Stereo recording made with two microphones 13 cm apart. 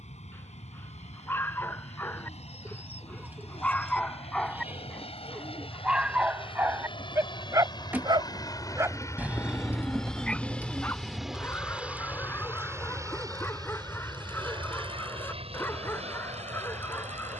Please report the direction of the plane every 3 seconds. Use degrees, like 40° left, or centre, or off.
60° left, 50° left, 40° left, 10° left, 30° right, 50° right.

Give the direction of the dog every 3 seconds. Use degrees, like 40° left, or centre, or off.
20° left, centre, 20° right, 10° left, 20° left, 20° left.